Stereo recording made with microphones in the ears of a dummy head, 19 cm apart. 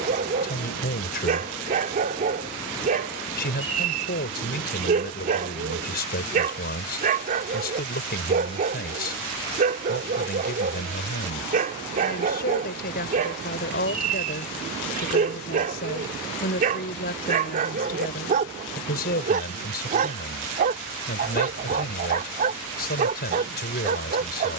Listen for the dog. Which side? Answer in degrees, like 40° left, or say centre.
40° right.